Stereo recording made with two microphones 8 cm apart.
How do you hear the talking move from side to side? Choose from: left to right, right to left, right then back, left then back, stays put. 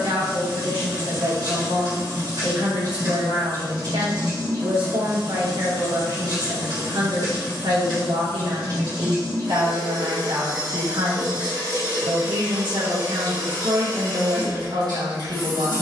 stays put.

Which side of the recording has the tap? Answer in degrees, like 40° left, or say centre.
50° right.